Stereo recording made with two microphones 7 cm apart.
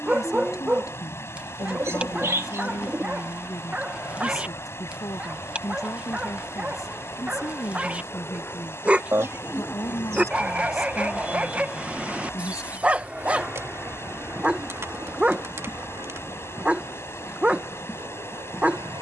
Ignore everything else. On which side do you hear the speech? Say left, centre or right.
left.